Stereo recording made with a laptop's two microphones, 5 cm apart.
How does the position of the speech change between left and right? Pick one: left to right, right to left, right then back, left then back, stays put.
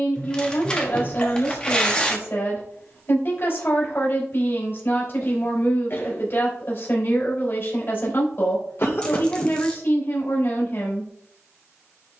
stays put.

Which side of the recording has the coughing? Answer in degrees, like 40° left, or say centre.
50° left.